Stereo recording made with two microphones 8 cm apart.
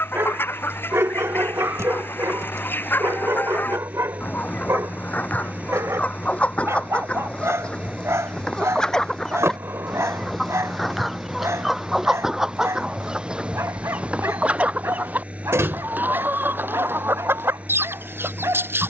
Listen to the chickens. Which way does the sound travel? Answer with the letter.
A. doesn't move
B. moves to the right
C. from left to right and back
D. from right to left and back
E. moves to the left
B.